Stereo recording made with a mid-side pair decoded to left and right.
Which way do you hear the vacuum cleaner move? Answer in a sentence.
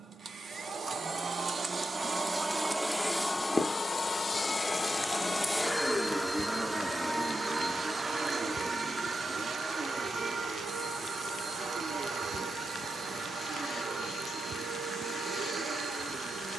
In this clip you hear the vacuum cleaner go left and come back.